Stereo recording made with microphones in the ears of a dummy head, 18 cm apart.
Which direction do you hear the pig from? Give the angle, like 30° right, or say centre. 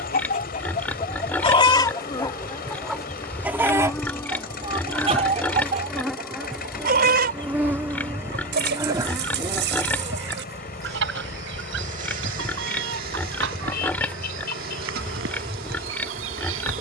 10° left.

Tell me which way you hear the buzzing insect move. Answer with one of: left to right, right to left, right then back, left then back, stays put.
left to right.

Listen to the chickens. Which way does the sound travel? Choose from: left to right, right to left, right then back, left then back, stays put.
left to right.